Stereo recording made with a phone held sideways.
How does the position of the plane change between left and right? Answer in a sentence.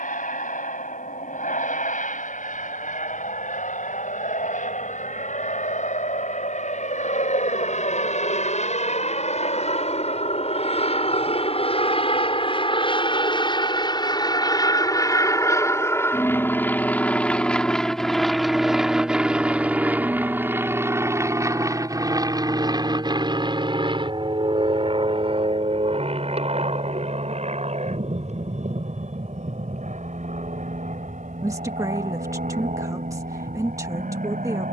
In this clip you hear the plane move from left to right.